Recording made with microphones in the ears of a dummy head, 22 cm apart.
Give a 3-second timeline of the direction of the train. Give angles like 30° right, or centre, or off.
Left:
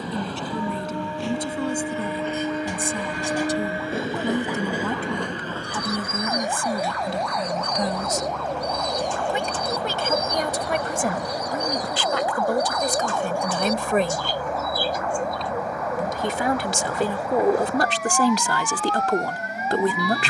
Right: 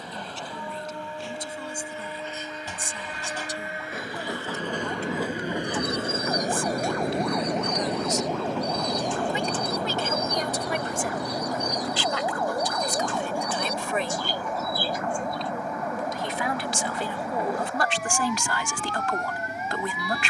50° left, 10° left, 50° right, 70° right, 80° right, 80° right, 80° right.